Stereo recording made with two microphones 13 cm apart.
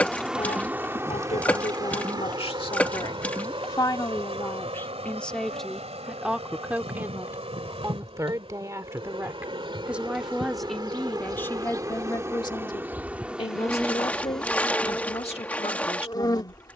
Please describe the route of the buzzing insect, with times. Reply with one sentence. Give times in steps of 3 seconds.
You can hear the buzzing insect on the right from 0 s, in the centre from 12 s and on the left from 15 s.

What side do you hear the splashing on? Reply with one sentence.
You can hear the splashing in the centre.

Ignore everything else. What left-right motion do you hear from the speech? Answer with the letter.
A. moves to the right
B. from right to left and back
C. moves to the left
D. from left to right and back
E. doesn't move
D.